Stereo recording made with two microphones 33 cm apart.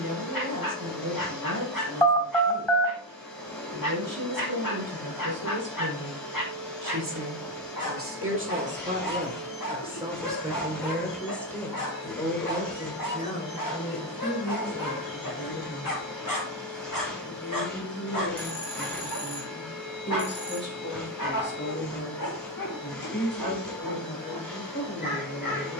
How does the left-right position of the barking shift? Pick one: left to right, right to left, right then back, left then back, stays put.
stays put.